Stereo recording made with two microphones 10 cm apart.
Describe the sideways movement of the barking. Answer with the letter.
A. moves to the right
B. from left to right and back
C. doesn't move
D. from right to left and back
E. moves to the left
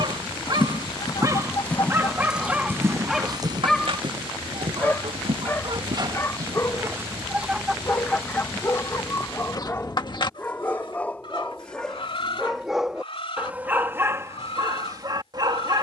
D.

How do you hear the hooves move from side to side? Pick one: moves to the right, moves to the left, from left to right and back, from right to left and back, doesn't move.
moves to the right.